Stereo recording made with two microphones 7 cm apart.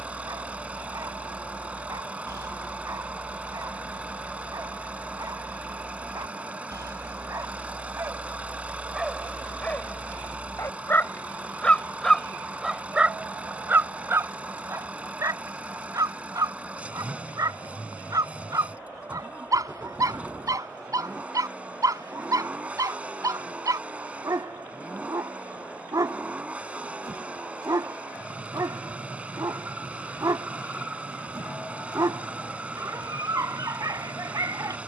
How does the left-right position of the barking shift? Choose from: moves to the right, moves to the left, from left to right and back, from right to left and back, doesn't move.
from right to left and back.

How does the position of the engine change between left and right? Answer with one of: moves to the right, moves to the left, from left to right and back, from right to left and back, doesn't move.
doesn't move.